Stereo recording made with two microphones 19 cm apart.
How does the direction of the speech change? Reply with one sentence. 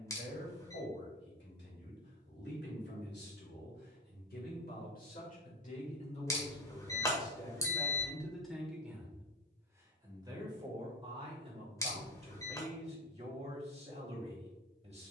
In this clip you hear the speech move to the right.